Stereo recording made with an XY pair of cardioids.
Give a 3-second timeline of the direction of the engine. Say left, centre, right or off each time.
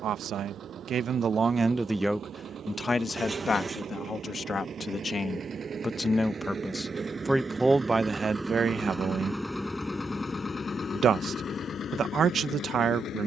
right, right, right, left, left.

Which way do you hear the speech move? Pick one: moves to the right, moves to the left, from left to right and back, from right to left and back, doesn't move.
from right to left and back.